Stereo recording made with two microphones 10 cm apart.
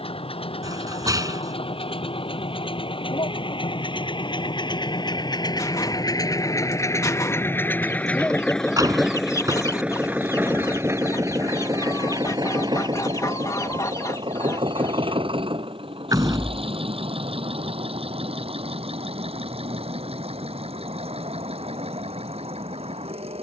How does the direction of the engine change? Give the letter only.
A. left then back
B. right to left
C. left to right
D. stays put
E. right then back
C.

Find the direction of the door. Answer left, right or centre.
right.